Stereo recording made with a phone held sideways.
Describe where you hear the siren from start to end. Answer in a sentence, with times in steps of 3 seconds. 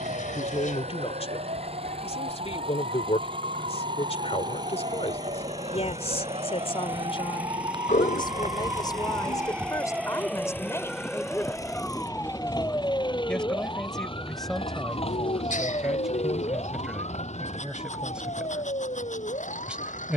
In this clip you hear the siren on the right from 0 s, in the centre from 9 s and on the left from 12 s.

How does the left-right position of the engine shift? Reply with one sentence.
In this clip you hear the engine move from right to left.